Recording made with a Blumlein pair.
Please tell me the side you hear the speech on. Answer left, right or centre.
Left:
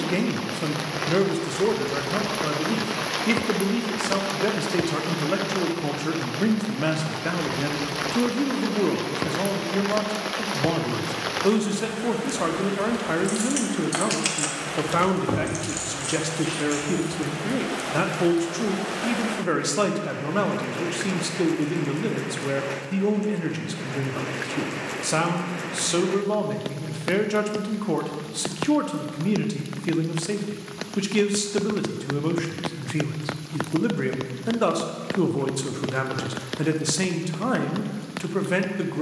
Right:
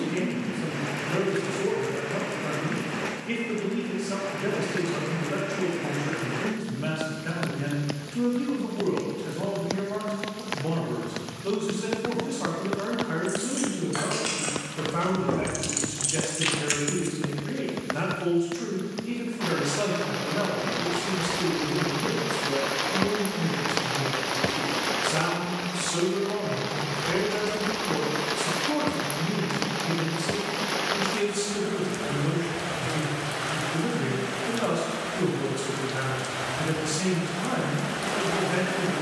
left.